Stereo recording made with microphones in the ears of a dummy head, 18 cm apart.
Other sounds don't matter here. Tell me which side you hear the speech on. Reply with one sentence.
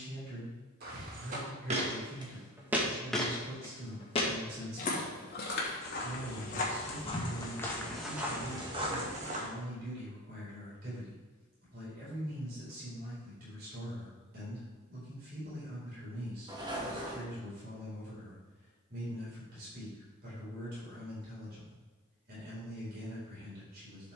In this clip you hear the speech on the right.